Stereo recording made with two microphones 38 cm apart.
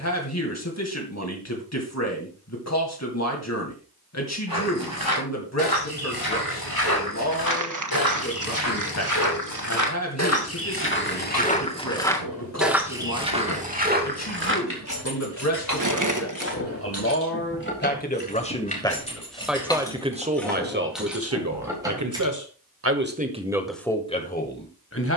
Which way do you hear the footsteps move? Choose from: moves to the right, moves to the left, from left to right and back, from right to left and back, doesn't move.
moves to the right.